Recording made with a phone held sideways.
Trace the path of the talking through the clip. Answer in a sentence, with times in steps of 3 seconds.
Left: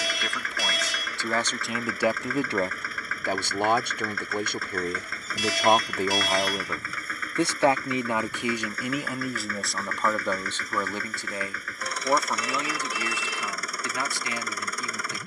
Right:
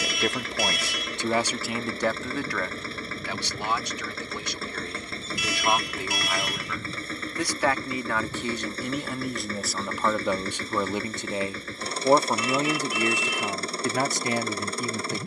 In this clip you hear the talking in the centre from 0 s, on the left from 3 s, in the centre from 9 s and on the right from 12 s.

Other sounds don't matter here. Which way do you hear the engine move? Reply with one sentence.
In this clip you hear the engine stay in one place.